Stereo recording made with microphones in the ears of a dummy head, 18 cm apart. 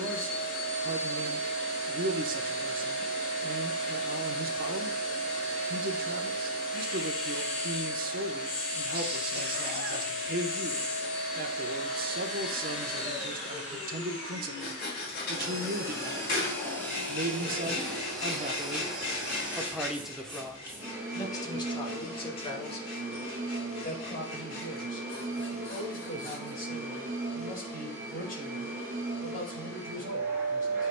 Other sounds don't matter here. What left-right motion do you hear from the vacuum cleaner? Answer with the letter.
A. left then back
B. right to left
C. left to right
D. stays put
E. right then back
C.